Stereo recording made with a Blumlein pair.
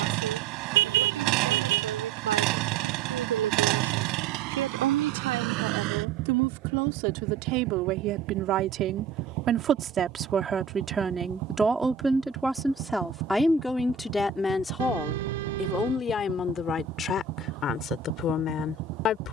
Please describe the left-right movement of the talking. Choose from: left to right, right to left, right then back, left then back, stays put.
right to left.